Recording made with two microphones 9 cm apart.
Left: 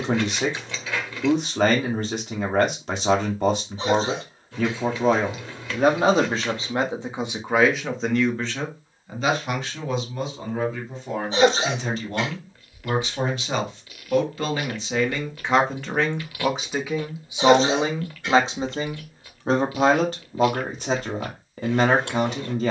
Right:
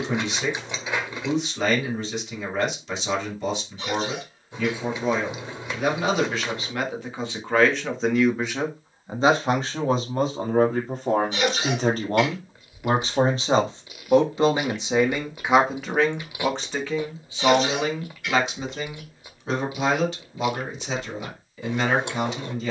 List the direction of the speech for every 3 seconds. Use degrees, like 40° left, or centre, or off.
50° left, 50° left, 20° left, 40° right, 30° right, 10° left, 40° left, 50° left.